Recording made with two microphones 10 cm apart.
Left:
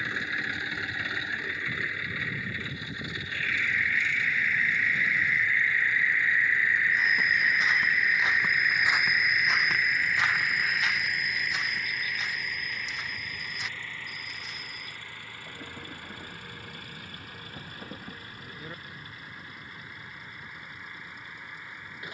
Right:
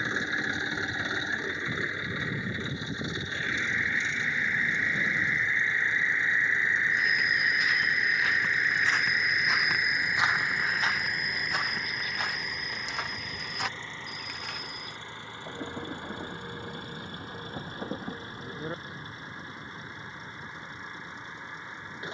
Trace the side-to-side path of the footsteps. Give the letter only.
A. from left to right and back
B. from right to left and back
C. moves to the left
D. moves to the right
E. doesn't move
D.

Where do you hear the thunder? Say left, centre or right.
right.